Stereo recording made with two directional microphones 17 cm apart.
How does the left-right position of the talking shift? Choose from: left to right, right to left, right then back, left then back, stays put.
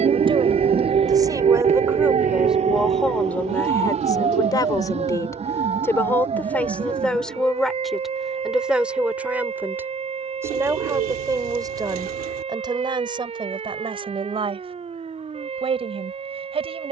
left then back.